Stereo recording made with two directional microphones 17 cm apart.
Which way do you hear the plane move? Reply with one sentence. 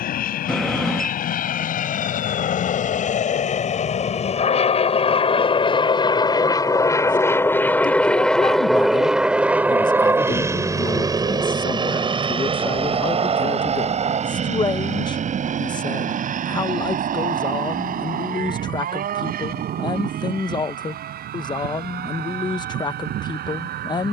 You can hear the plane move from left to right.